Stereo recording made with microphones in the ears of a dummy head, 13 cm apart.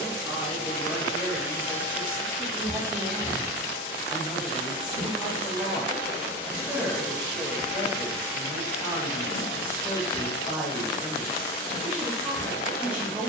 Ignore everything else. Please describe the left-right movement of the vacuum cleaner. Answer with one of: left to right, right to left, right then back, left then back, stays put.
right then back.